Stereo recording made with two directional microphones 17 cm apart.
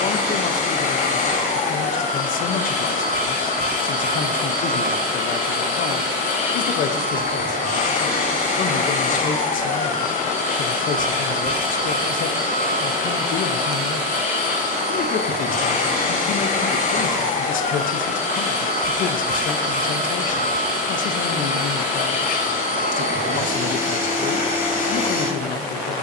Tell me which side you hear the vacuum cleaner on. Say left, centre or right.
left.